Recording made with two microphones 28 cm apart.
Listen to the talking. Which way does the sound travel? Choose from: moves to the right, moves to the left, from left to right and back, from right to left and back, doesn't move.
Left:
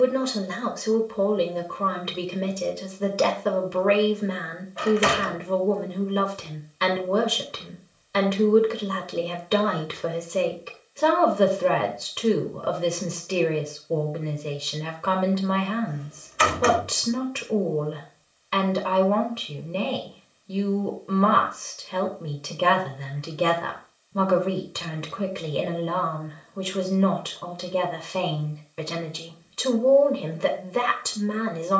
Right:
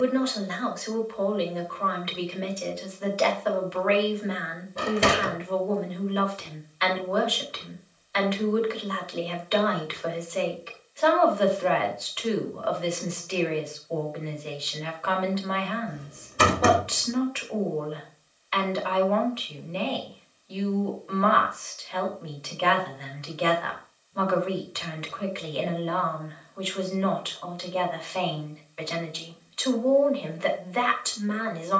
doesn't move.